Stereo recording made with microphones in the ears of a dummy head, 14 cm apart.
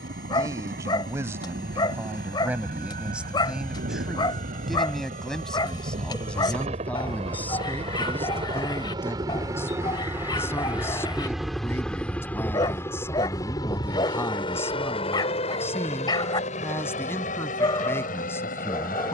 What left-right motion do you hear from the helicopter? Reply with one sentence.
You can hear the helicopter move to the left.